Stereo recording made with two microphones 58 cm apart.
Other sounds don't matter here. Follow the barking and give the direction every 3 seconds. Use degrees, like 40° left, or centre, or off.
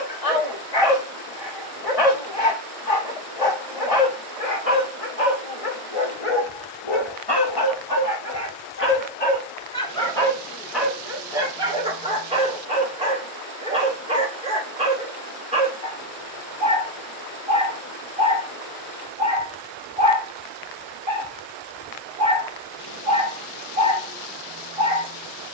80° left, 80° left, 40° left, centre, 10° right, 10° right, 10° right, 10° right, 10° right.